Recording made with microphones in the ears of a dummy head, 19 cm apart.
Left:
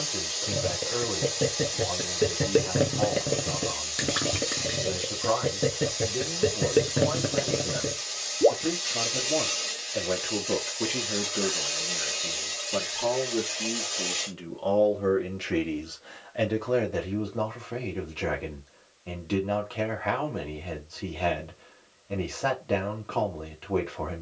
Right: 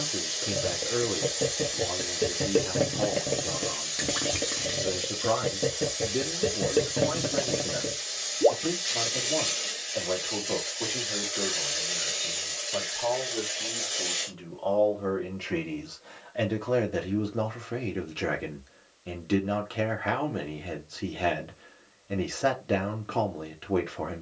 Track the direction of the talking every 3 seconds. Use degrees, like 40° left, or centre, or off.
30° right, 30° right, 10° right, 30° left, 40° left, centre, 20° right, 20° right.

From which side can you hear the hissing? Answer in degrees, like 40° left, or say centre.
centre.